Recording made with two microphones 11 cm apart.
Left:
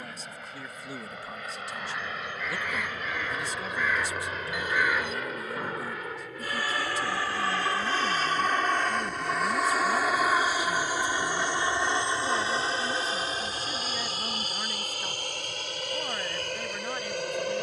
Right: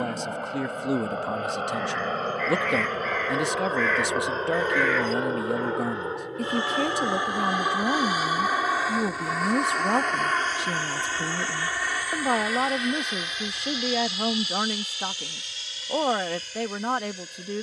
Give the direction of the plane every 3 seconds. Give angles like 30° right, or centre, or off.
50° right, 40° right, 20° right, 10° left, 30° left, 50° left.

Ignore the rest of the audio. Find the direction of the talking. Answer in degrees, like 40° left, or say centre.
70° right.